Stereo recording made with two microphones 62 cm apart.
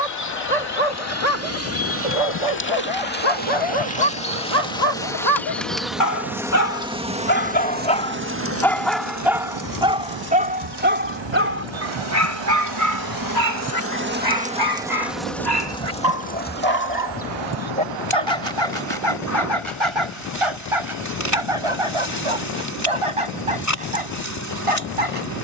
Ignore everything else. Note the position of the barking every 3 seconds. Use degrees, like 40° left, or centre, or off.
60° left, 50° left, 20° left, 10° right, 30° right, 40° right, 50° right, 50° right, 60° right.